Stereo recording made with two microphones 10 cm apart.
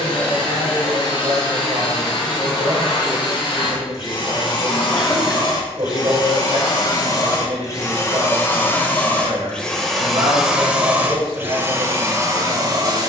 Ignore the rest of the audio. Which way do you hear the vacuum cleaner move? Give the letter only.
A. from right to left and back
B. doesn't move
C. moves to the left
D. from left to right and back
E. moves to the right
E.